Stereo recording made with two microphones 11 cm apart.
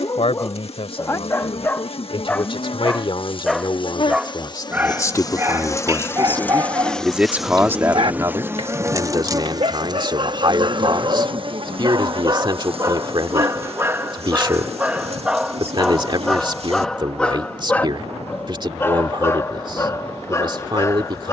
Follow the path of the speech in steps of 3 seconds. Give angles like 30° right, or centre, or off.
60° left, 40° left, 20° right, 40° right, 40° right, 40° right, 40° right.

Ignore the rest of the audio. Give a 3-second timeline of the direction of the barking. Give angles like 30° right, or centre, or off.
20° left, 20° right, 40° right, 50° right, 30° right, centre, 30° left.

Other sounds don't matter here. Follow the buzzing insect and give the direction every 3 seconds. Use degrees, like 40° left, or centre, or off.
60° left, 40° left, centre, 40° right, 60° right, 70° right, 70° right.